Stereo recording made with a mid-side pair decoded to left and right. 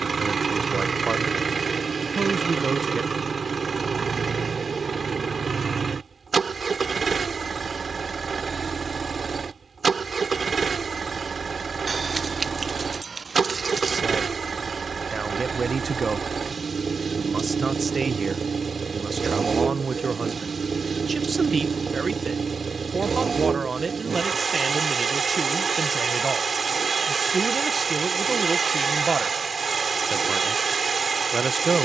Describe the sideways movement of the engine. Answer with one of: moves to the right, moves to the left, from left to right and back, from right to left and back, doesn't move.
doesn't move.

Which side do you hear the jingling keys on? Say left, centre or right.
right.